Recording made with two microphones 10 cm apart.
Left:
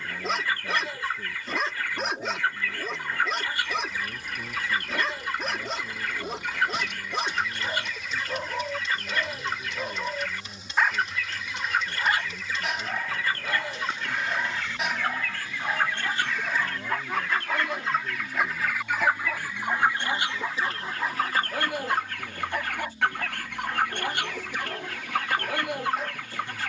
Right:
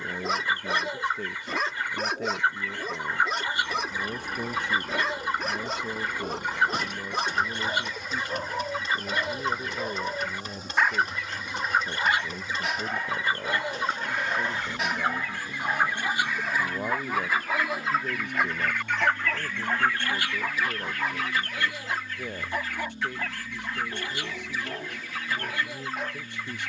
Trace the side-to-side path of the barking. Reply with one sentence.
You can hear the barking stay in one place.